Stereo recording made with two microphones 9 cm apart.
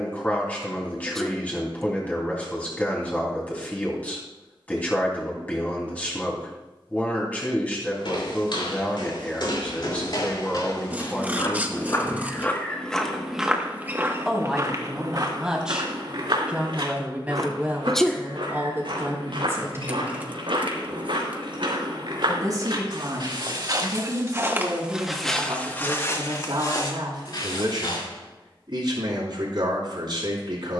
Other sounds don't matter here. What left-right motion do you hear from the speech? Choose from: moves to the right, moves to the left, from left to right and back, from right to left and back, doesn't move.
moves to the right.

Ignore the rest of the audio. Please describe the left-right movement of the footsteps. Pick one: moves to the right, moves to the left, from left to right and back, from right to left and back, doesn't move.
from left to right and back.